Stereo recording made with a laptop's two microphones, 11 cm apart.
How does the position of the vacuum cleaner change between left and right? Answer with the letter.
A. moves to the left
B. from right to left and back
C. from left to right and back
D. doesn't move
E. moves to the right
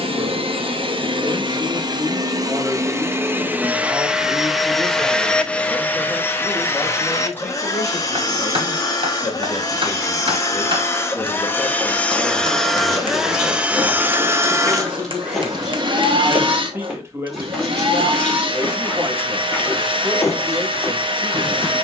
B.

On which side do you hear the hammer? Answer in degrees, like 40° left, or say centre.
50° right.